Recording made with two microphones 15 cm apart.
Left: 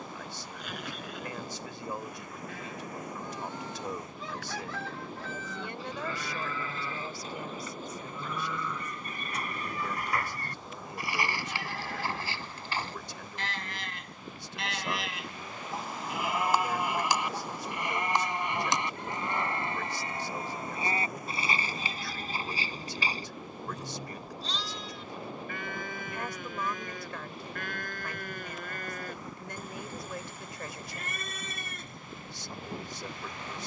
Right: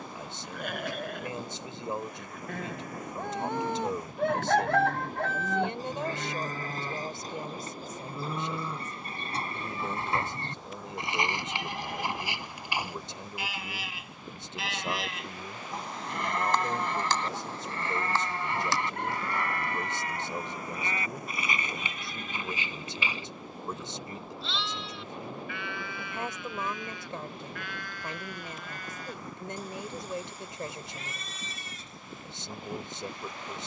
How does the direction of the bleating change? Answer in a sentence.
In this clip you hear the bleating move to the left.